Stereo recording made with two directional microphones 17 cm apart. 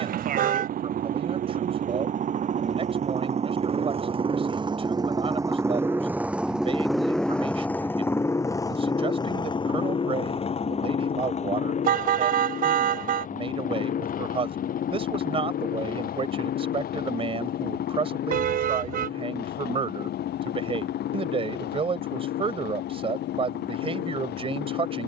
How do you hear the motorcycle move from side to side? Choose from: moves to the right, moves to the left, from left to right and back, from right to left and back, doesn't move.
moves to the left.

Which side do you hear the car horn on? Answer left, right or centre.
right.